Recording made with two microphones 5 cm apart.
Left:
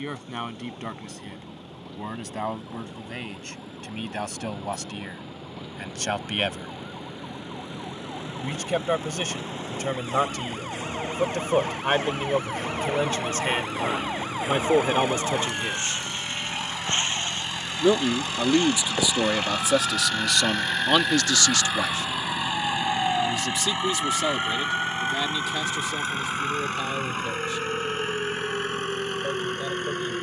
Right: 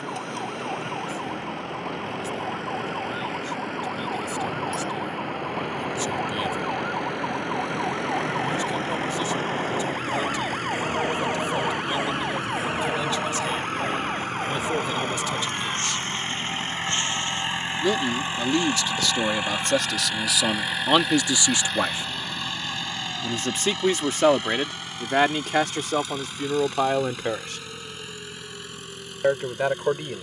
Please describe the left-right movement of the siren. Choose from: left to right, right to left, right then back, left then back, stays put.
right to left.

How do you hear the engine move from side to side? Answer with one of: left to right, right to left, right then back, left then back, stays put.
right to left.